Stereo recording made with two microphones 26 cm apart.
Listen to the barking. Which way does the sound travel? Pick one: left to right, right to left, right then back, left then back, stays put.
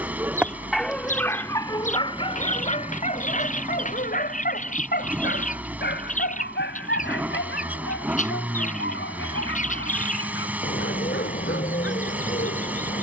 right to left.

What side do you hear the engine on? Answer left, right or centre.
centre.